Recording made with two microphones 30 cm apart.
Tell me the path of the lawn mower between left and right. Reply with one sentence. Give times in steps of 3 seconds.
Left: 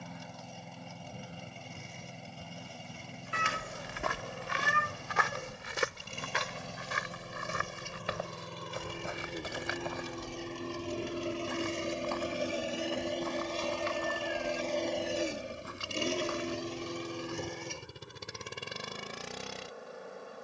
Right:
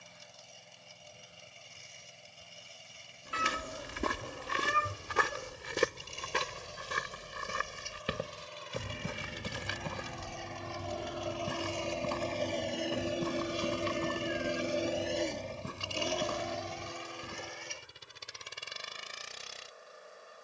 You can hear the lawn mower on the left from 0 s, in the centre from 12 s and on the left from 15 s.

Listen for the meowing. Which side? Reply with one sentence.
You can hear the meowing on the left.